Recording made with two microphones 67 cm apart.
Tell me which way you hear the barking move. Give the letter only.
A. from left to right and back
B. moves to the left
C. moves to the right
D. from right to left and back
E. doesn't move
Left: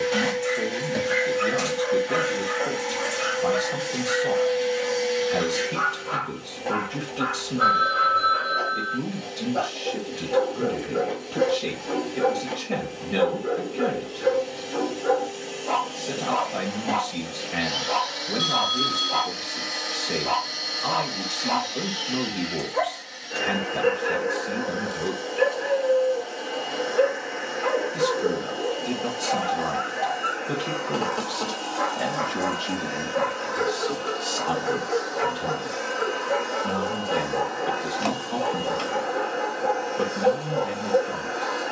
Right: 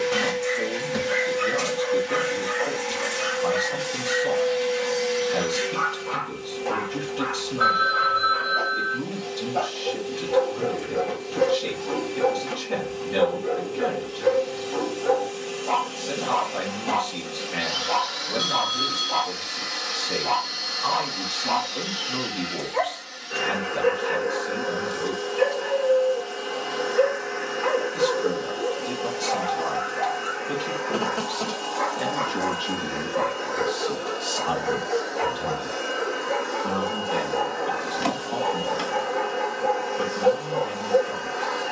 E.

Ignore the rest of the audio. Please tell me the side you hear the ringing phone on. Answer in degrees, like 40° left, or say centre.
50° right.